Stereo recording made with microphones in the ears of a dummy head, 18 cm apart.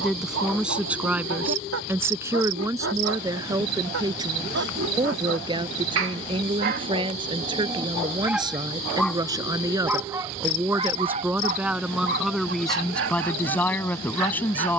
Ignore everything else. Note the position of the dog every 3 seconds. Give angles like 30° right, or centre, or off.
80° right, 80° right, 30° right, 20° right, 70° right.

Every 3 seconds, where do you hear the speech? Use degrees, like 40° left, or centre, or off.
10° right, 20° right, 20° right, 10° right, 10° left.